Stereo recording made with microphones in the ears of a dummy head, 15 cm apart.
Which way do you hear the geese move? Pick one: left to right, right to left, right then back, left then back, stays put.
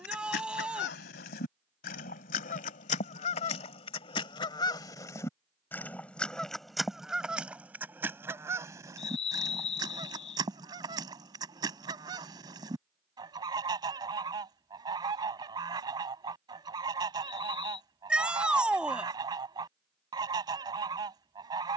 left to right.